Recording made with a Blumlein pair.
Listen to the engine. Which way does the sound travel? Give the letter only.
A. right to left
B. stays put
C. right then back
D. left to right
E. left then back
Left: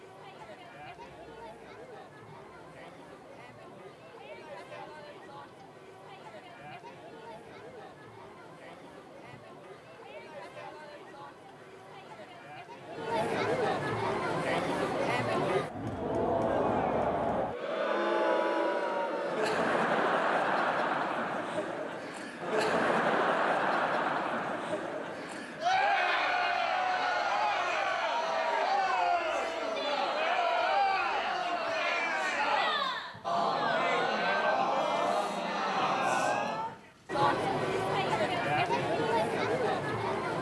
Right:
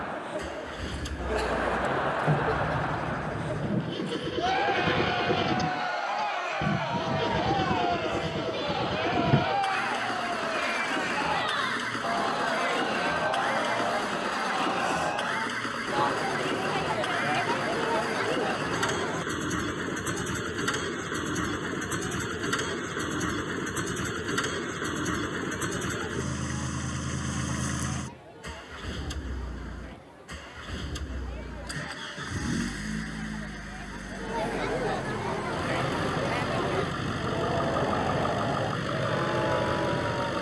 B.